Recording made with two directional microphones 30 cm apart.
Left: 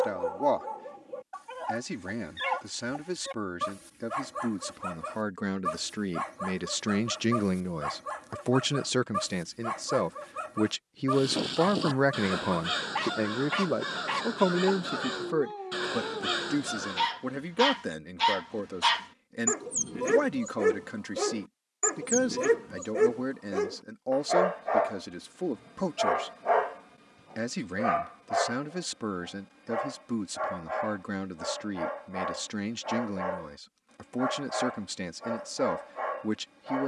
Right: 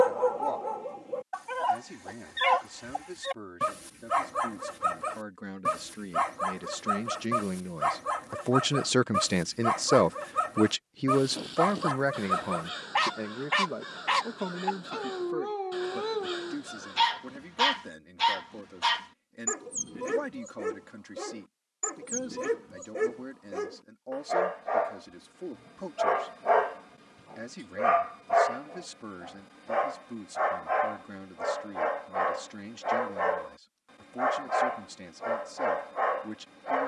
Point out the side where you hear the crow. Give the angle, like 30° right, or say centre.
60° left.